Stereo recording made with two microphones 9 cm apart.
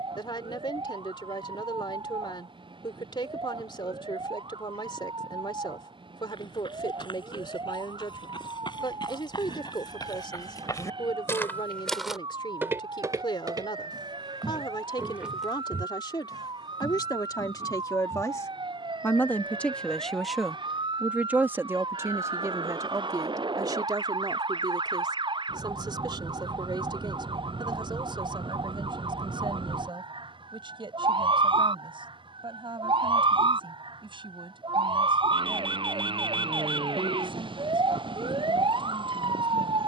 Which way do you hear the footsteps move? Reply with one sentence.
You can hear the footsteps move from left to right and back again.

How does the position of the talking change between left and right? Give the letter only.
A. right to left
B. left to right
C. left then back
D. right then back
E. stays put
B.